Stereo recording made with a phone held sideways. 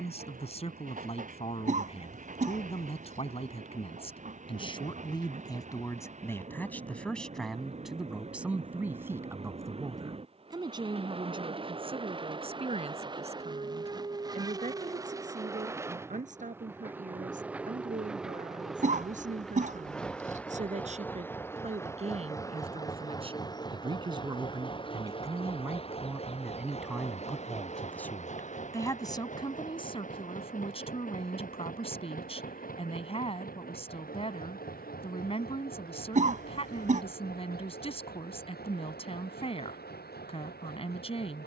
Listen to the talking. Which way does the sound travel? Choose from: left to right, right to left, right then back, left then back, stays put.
right then back.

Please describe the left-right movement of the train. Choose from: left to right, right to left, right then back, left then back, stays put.
right to left.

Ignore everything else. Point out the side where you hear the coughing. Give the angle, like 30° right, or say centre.
50° right.